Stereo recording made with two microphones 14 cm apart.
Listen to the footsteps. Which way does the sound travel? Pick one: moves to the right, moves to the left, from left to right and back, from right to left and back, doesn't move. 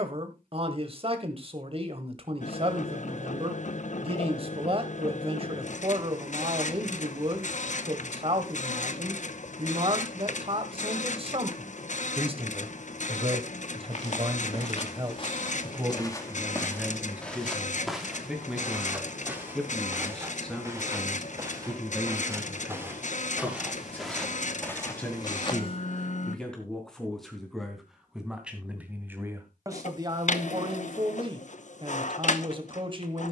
from left to right and back.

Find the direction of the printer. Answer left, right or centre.
left.